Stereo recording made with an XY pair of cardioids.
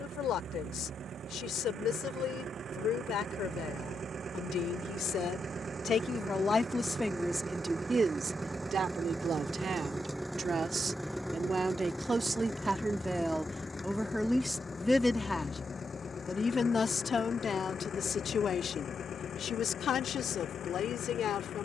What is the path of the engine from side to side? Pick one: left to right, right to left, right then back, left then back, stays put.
right to left.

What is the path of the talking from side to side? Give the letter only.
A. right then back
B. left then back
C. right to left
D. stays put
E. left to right
A.